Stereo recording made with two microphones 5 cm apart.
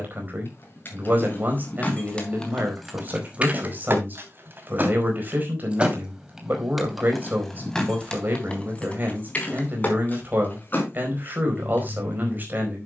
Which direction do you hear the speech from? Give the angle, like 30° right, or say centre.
40° right.